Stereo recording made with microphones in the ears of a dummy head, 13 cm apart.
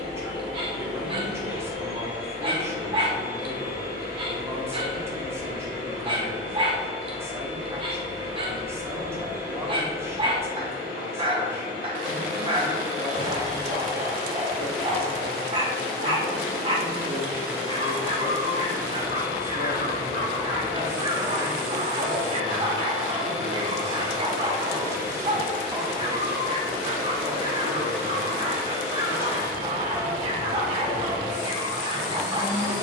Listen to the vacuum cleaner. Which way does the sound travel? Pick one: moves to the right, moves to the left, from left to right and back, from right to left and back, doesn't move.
doesn't move.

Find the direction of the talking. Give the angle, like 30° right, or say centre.
20° right.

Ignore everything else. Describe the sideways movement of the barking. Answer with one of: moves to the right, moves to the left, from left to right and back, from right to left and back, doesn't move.
doesn't move.